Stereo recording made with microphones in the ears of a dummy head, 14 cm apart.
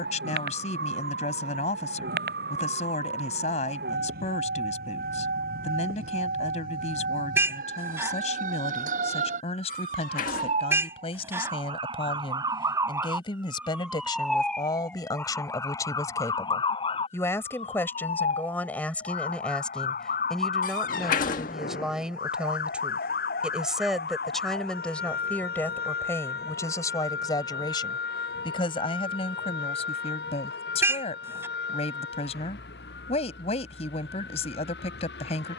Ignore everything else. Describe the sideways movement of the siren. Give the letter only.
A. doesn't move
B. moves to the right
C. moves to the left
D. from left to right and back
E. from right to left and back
C.